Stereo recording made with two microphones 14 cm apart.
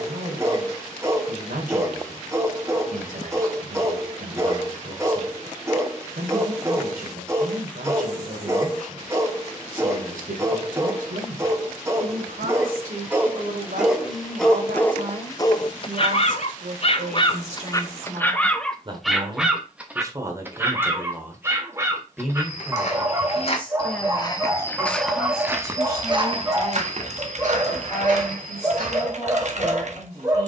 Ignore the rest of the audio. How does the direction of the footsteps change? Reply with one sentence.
In this clip you hear the footsteps go from the left side to the right.